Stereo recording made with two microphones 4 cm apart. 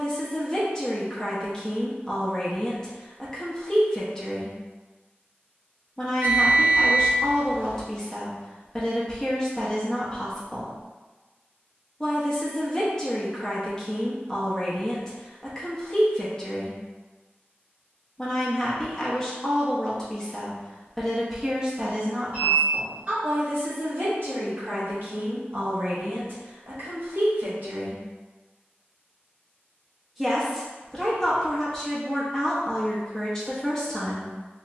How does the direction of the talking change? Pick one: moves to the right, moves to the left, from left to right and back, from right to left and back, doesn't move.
from left to right and back.